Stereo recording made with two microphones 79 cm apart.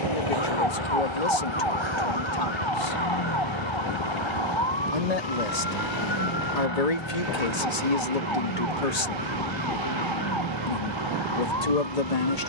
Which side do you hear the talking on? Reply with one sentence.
You can hear the talking on the left.